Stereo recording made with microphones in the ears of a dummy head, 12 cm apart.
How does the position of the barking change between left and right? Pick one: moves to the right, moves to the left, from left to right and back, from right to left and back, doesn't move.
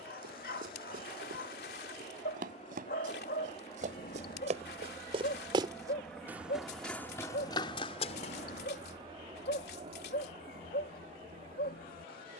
doesn't move.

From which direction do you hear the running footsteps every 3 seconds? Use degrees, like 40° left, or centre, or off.
70° right, 50° right, 20° left, off.